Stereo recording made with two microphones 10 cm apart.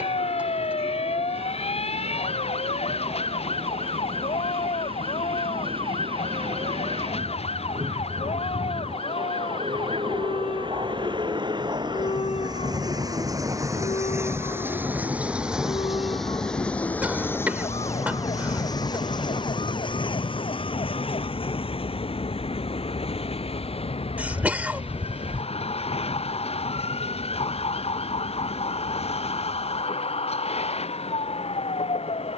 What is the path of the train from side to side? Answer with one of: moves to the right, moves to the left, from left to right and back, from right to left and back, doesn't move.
moves to the left.